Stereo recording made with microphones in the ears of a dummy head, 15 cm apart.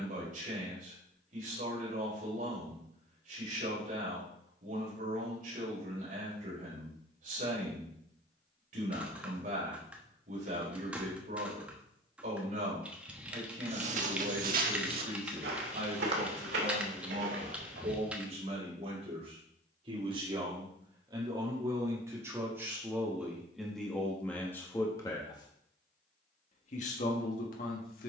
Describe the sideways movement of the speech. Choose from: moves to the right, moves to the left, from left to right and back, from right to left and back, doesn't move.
moves to the left.